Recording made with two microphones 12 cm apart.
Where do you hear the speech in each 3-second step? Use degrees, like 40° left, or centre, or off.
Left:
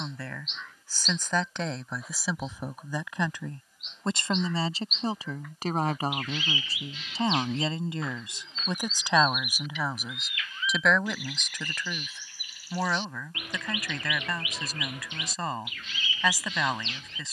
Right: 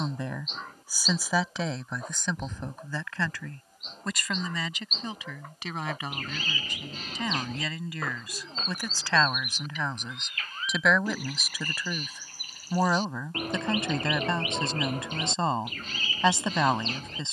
centre, 30° left, 30° left, centre, 20° right, 30° right.